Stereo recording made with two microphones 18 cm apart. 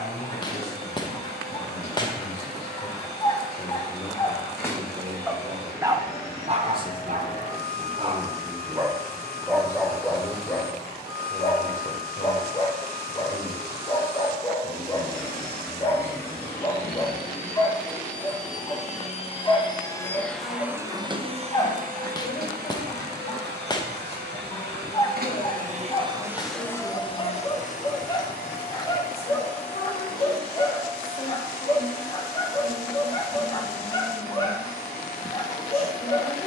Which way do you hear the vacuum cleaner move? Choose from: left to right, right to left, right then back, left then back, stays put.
right then back.